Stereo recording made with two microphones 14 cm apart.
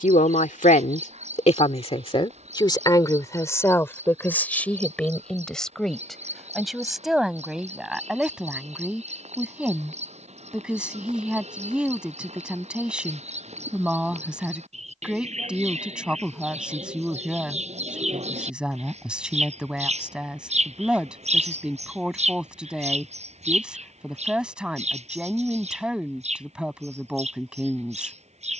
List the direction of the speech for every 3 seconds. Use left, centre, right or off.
left, centre, centre, centre, centre, centre, centre, centre, centre, centre.